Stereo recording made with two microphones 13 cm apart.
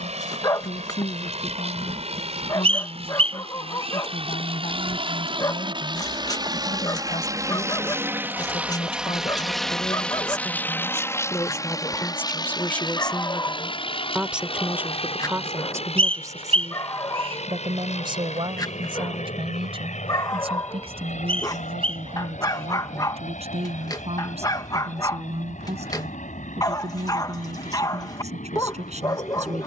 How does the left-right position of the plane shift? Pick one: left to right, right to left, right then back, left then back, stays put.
right to left.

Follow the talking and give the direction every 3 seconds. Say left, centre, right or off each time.
left, left, left, left, centre, right, right, right, right, right.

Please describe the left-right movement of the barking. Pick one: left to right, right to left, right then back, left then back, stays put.
stays put.